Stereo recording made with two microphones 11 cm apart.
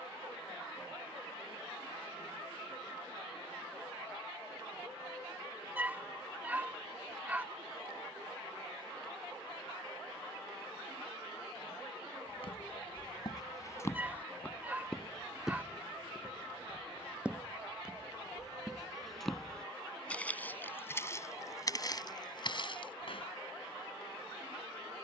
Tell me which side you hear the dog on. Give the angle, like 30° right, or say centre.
20° right.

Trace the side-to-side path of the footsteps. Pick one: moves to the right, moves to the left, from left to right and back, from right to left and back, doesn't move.
from left to right and back.